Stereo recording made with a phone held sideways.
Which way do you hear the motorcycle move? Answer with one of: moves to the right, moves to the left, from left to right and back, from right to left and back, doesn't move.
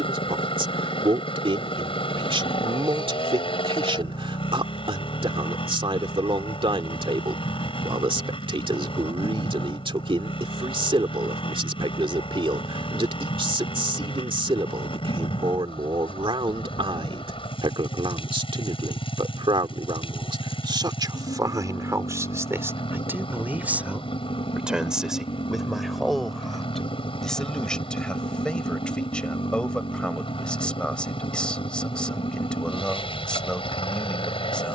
doesn't move.